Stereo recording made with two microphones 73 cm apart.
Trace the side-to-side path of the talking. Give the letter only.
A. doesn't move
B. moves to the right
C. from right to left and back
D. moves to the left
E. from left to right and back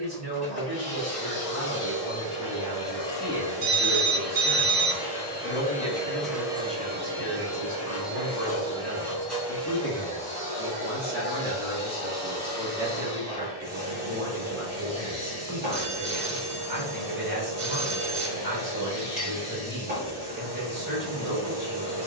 C.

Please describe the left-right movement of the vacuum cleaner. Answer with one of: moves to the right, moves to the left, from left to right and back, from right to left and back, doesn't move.
moves to the right.